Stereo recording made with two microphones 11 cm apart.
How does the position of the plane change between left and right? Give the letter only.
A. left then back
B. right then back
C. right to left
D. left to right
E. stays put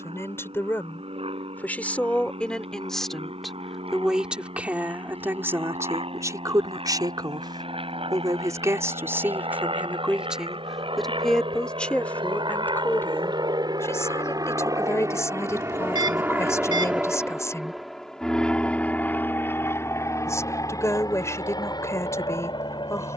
C.